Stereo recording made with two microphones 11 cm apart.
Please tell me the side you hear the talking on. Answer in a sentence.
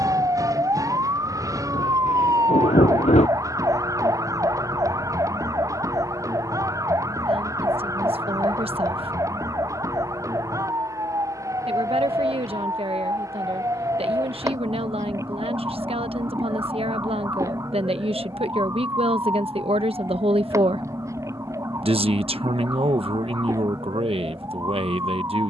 In this clip you hear the talking on the right.